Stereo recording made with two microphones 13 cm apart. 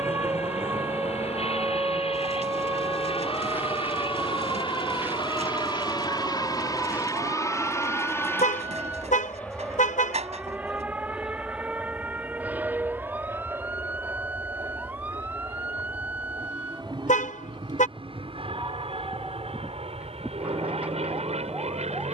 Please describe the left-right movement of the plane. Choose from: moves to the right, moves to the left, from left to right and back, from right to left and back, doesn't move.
moves to the right.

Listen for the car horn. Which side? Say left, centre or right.
left.